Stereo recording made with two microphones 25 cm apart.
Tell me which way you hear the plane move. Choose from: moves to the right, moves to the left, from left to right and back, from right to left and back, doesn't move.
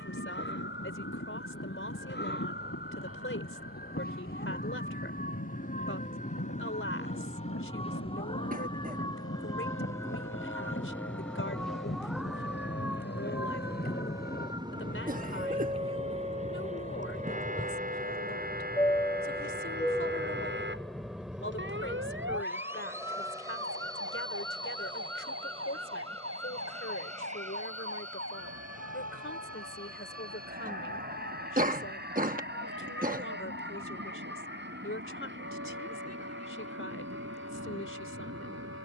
moves to the right.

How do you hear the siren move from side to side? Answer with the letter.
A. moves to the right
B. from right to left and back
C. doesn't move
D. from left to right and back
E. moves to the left
A.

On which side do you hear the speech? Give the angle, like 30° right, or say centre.
60° left.